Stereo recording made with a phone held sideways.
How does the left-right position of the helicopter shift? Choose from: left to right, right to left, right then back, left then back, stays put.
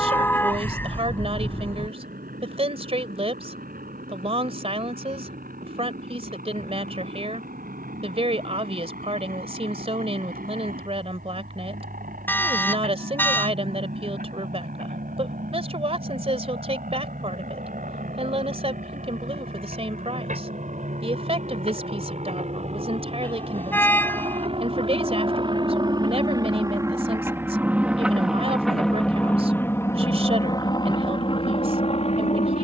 right to left.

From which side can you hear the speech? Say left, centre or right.
right.